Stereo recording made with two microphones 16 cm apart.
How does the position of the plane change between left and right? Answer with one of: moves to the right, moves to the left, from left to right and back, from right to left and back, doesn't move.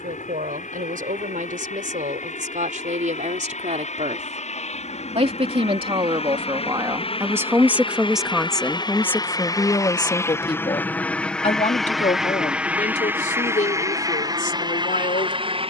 moves to the right.